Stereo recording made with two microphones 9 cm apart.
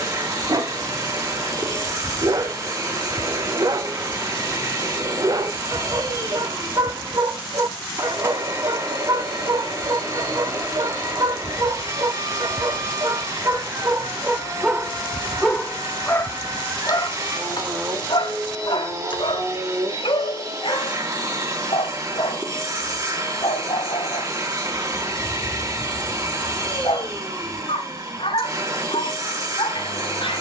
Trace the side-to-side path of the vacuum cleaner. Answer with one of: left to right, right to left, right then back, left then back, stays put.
stays put.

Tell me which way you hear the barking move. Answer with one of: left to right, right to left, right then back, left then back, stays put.
right to left.